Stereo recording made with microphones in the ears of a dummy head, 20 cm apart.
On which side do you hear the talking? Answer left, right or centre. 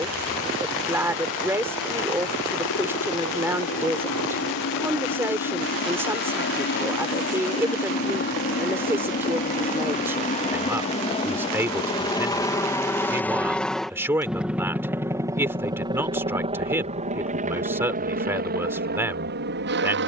centre.